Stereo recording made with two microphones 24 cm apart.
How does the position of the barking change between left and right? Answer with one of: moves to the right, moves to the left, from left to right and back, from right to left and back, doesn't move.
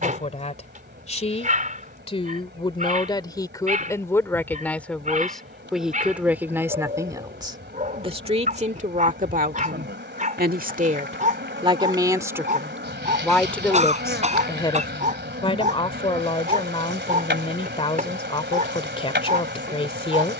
doesn't move.